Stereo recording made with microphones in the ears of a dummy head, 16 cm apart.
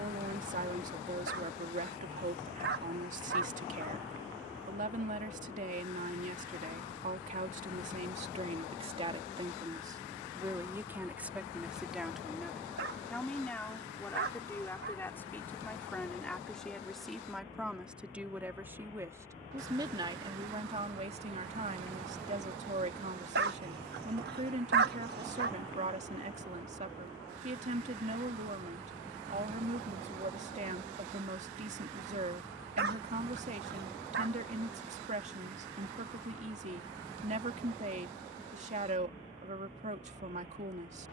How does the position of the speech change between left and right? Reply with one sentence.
In this clip you hear the speech move from right to left and back again.